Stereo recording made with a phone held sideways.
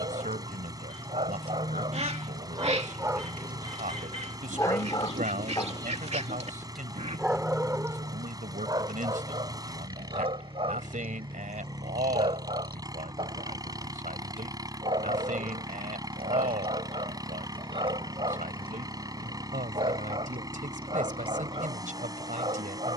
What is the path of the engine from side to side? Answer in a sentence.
In this clip you hear the engine stay put.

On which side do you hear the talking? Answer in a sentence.
In this clip you hear the talking on the right.